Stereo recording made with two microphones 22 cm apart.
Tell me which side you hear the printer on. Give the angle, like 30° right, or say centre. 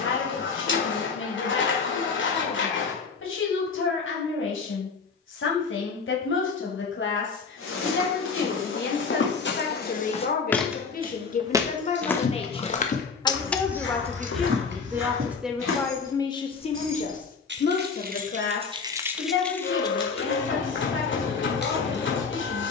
60° left.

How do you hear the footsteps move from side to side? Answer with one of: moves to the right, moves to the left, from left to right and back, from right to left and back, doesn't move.
from left to right and back.